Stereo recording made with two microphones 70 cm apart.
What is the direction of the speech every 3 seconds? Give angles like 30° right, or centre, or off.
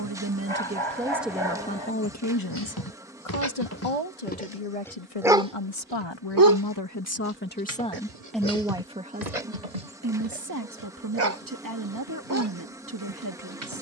centre, 50° left, 10° left, 20° right, 30° right.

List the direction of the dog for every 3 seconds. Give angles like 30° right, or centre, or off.
40° left, 10° left, 50° right, 80° right, 80° right.